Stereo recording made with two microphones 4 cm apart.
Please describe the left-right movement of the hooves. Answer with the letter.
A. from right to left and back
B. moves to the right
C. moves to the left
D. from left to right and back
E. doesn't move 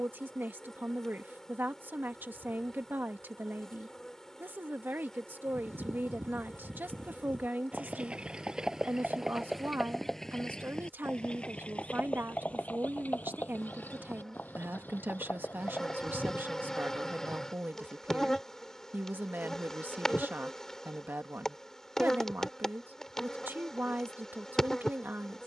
C.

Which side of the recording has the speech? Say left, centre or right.
right.